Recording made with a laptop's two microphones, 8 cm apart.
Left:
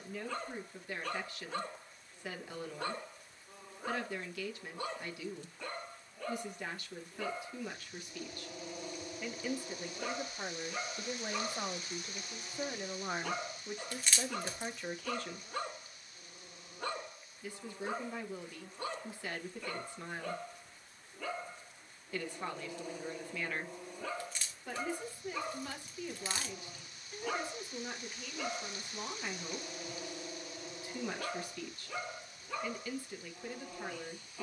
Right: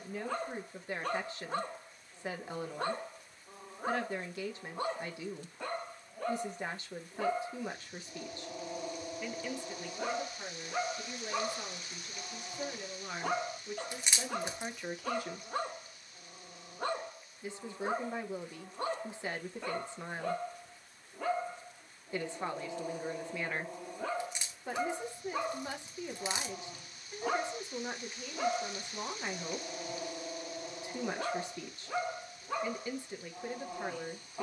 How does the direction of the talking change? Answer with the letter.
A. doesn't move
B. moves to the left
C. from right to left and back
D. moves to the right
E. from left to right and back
C.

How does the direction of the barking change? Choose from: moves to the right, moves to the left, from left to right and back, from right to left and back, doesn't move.
doesn't move.